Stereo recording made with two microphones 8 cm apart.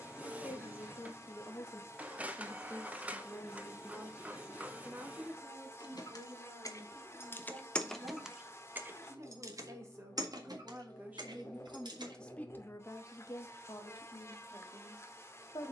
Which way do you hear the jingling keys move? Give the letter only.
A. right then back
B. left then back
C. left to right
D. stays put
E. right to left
C.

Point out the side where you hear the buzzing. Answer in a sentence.
You can hear the buzzing on the left.